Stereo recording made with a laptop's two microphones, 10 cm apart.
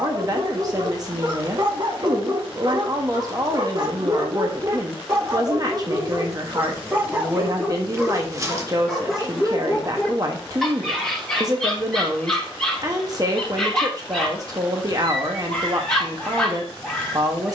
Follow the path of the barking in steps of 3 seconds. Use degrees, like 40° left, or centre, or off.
50° right, 40° right, 10° right, centre, 10° left, 10° left.